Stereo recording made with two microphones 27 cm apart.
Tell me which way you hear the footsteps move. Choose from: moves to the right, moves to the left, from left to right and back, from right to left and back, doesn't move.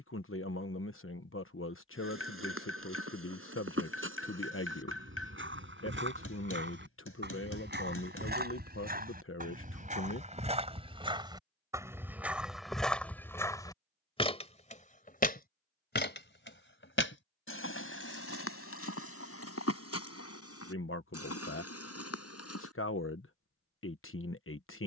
moves to the left.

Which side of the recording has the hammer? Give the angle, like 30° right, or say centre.
60° left.